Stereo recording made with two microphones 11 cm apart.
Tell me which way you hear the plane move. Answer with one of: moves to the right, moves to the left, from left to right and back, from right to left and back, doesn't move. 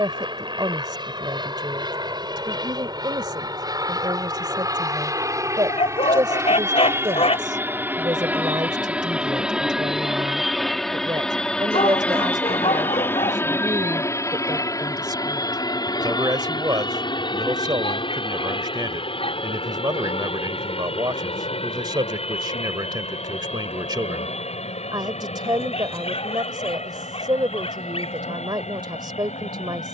moves to the left.